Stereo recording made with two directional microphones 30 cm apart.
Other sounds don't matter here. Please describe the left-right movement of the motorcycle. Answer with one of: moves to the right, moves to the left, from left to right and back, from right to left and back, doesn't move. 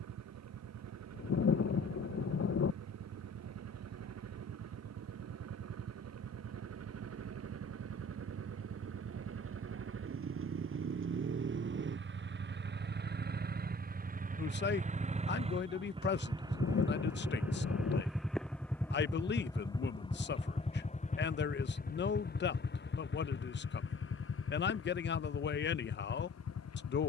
moves to the left.